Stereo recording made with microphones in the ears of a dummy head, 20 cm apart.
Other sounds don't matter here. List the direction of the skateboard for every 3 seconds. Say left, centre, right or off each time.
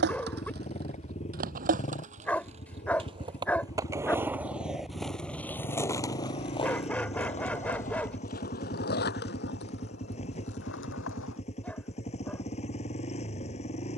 right, centre, left, left, off.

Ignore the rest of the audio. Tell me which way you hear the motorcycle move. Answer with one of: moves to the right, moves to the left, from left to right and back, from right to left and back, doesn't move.
doesn't move.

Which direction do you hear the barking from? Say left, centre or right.
centre.